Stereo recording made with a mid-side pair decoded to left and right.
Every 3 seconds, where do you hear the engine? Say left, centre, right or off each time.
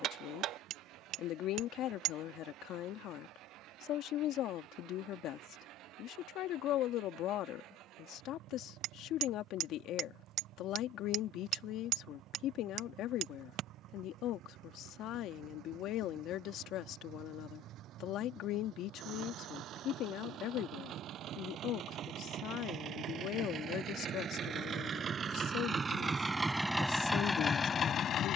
right, right, right, right, right, right, right, right, right, left.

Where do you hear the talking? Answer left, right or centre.
left.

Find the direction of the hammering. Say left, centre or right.
right.